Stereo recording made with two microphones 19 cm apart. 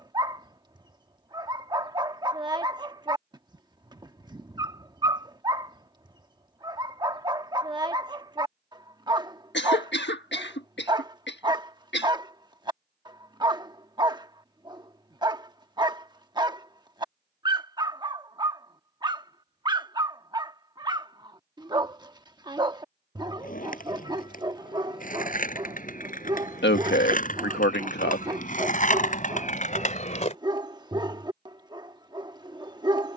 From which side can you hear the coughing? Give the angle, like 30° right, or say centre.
70° left.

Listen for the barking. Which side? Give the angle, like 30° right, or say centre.
20° right.